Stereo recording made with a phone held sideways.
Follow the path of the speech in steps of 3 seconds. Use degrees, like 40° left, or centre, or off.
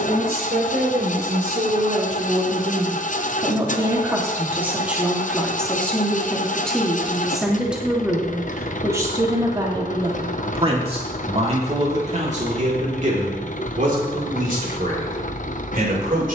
60° right, 10° right, centre, 30° right, 60° right, 70° right.